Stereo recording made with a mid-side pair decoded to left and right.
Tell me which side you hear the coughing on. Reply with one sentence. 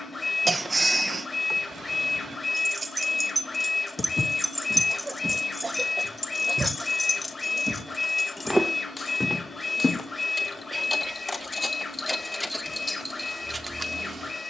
In this clip you hear the coughing on the right.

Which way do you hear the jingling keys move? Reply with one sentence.
You can hear the jingling keys move from right to left and back again.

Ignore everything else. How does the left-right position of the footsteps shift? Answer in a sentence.
In this clip you hear the footsteps go right and come back.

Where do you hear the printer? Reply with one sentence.
In this clip you hear the printer on the left.